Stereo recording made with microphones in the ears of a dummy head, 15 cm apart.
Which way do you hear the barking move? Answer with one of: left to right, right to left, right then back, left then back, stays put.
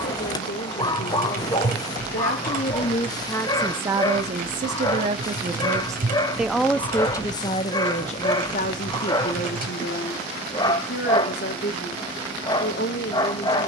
stays put.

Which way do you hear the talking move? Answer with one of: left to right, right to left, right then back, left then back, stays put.
right then back.